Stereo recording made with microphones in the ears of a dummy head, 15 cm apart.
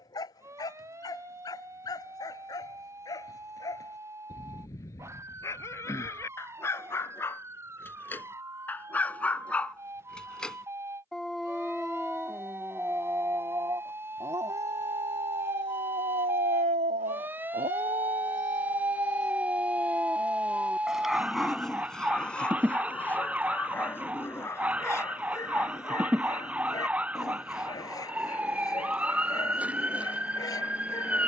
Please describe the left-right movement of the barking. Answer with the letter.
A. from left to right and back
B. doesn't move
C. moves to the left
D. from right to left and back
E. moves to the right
A.